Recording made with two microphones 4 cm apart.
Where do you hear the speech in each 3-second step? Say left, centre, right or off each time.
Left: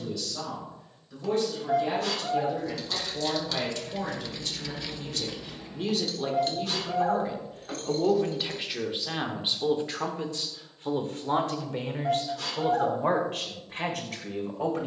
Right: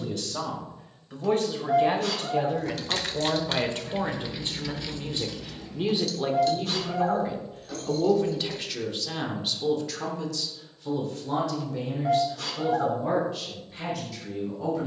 right, right, centre, left, left.